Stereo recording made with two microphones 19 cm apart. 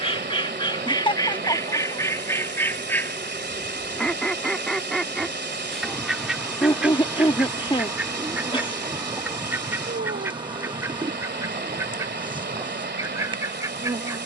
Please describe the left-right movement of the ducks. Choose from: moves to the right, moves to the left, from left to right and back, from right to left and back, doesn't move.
moves to the right.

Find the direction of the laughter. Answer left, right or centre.
left.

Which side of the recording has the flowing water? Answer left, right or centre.
right.